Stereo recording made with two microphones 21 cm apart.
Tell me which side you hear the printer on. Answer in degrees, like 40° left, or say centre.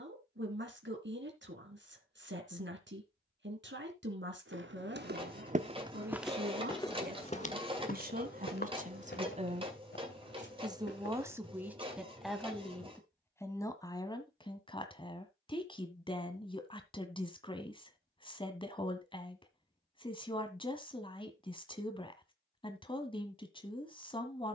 30° right.